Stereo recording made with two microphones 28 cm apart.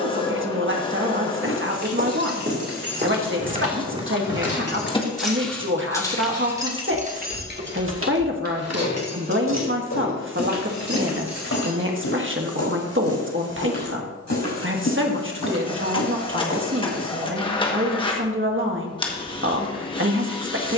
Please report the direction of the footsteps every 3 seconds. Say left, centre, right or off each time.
right, centre, left, left, left, left, off.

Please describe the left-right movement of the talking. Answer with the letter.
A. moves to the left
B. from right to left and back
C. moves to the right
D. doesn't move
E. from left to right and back
D.